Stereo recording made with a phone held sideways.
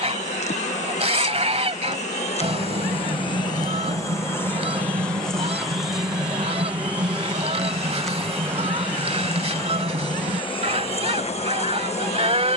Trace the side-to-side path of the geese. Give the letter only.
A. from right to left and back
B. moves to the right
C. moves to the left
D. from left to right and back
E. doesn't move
E.